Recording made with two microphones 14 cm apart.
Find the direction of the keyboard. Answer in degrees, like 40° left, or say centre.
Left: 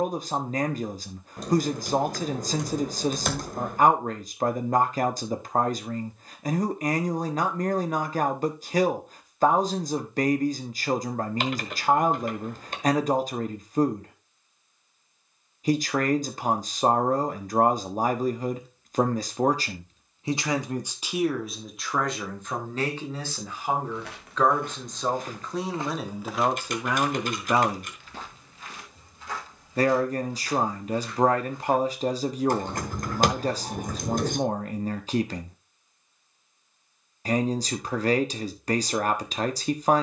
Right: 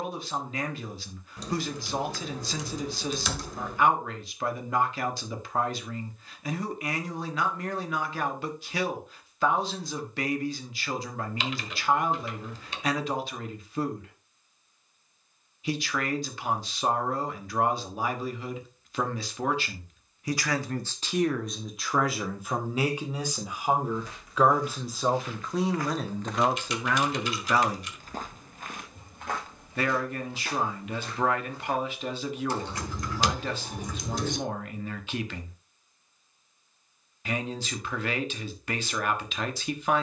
50° left.